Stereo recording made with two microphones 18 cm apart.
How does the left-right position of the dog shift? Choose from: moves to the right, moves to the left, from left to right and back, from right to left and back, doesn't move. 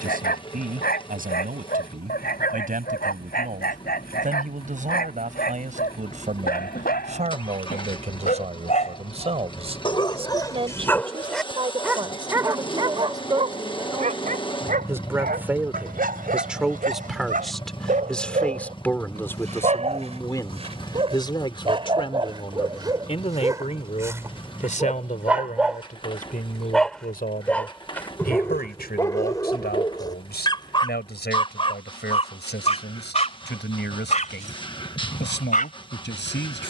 from left to right and back.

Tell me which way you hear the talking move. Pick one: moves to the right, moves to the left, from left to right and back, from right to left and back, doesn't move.
moves to the left.